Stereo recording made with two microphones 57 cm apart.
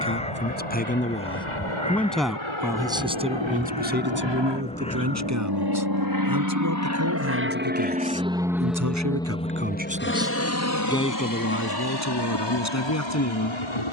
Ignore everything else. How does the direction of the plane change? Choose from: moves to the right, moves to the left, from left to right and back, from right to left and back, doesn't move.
moves to the left.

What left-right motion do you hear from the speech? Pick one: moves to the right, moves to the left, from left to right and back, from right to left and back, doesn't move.
from left to right and back.